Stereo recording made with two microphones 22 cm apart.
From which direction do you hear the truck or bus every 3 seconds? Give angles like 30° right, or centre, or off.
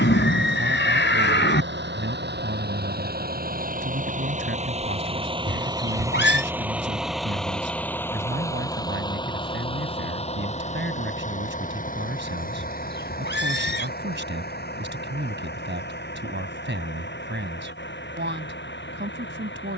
60° right, 30° right, centre, 30° left, 50° left, 50° left, 60° left.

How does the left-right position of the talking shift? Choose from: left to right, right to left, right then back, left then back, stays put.
stays put.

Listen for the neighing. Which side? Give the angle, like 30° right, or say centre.
60° left.